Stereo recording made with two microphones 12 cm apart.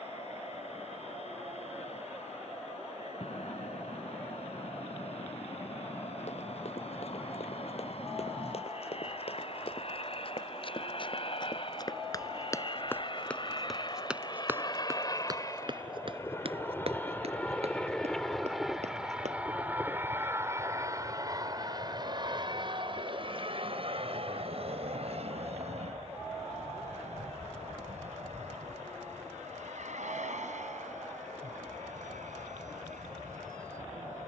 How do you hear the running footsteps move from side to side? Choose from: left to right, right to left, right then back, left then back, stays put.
left to right.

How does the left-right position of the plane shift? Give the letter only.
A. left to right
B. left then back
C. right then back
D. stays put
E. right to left
A.